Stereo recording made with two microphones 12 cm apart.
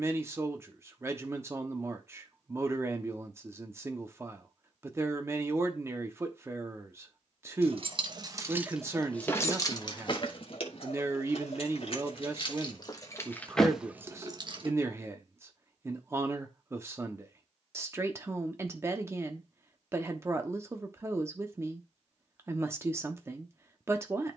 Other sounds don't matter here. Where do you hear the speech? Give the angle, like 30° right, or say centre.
20° right.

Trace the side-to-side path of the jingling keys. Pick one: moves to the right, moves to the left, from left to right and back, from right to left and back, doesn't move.
from right to left and back.